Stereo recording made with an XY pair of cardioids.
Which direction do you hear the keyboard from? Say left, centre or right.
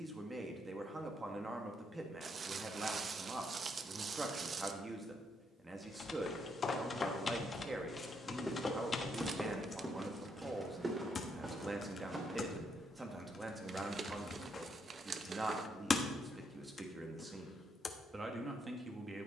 left.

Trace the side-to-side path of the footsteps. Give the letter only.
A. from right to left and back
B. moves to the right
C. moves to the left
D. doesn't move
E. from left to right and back
B.